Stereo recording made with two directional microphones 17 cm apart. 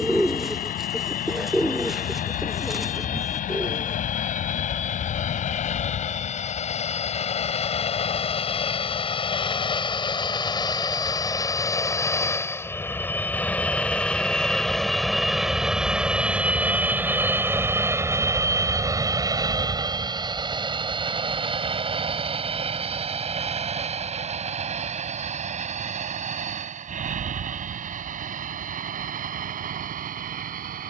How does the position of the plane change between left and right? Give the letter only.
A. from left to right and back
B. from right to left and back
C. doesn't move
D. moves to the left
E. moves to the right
E.